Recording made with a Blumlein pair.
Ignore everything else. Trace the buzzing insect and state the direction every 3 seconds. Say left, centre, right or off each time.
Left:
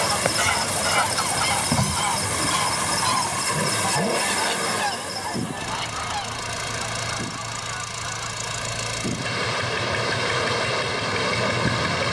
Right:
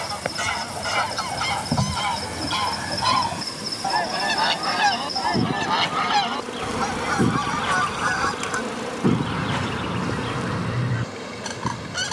centre, centre, right, centre.